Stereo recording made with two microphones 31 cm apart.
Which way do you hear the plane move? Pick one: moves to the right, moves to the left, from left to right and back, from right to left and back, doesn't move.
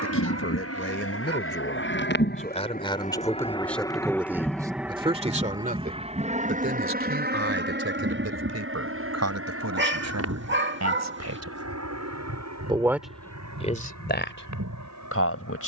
moves to the right.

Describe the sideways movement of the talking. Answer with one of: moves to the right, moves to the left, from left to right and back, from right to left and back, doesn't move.
from left to right and back.